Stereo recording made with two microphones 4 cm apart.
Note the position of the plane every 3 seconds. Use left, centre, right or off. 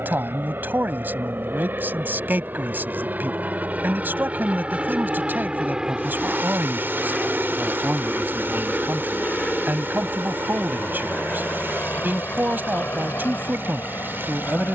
right, right, centre, left, left.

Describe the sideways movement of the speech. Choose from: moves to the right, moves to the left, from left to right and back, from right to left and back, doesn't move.
doesn't move.